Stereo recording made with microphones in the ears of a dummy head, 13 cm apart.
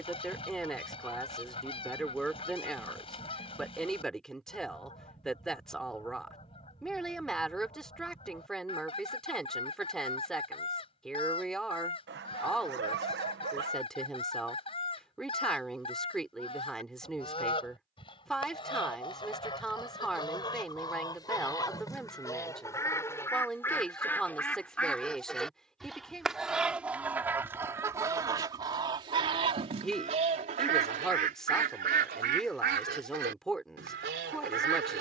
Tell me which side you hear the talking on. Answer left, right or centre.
centre.